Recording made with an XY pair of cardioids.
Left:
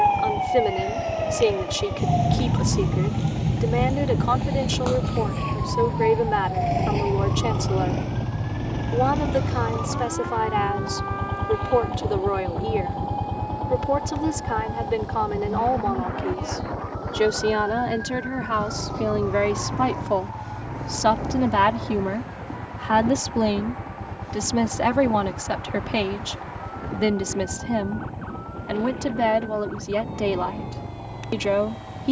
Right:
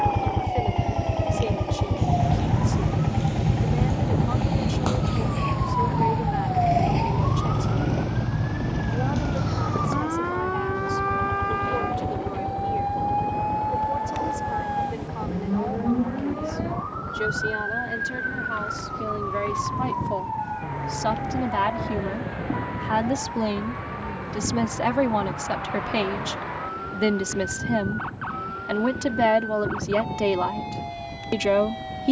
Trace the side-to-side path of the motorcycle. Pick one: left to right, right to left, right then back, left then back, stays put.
right to left.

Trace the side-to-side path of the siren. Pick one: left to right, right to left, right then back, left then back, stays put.
left to right.